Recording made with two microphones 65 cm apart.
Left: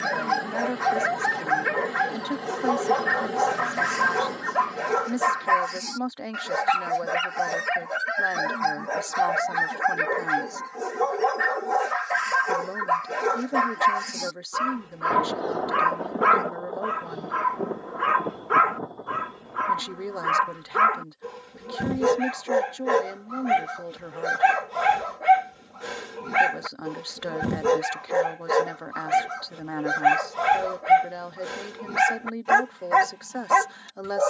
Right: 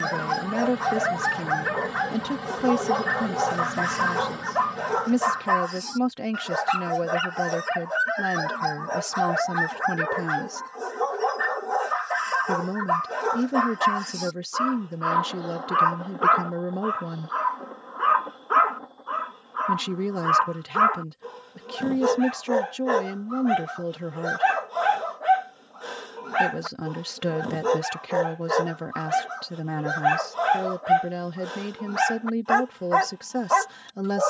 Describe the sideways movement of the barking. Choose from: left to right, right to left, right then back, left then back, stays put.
stays put.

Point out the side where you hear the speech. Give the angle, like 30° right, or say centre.
60° right.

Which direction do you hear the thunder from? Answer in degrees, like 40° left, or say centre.
70° left.